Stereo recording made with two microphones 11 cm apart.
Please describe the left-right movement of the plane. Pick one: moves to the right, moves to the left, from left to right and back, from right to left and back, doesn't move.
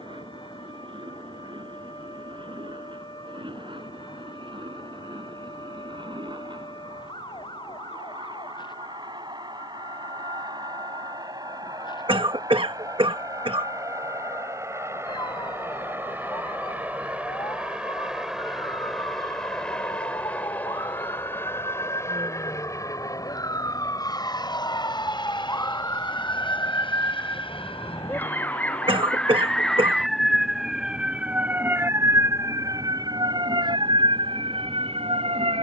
moves to the left.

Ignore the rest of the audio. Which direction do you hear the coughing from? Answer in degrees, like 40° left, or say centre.
60° right.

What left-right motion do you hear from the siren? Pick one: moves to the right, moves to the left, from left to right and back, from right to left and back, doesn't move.
moves to the right.